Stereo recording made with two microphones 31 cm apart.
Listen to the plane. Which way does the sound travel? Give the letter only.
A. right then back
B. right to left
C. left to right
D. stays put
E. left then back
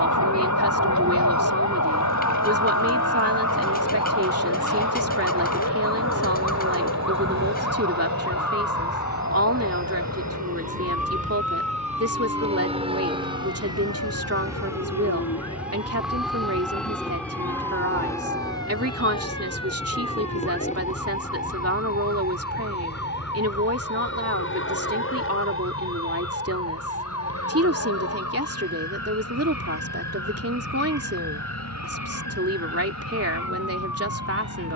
B.